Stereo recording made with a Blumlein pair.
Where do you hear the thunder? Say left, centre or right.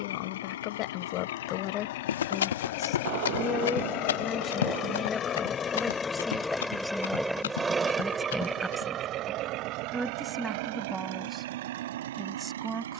right.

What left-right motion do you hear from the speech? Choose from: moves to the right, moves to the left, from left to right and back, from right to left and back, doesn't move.
moves to the right.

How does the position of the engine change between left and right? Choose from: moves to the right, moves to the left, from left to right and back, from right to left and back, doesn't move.
moves to the right.